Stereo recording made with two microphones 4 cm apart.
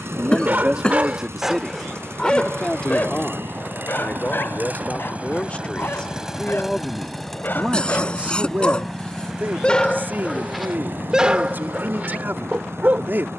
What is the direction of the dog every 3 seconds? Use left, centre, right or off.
centre, left, left, centre, right.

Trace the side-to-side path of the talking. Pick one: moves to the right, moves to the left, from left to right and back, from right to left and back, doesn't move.
from right to left and back.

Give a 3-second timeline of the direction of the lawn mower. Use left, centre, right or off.
right, right, centre, right, right.